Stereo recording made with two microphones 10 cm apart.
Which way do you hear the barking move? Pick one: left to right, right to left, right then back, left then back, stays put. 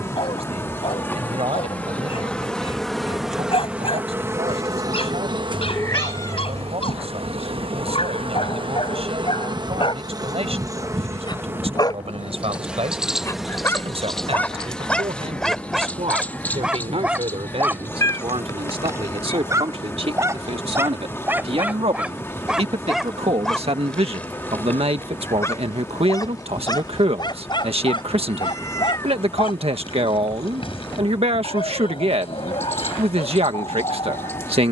right then back.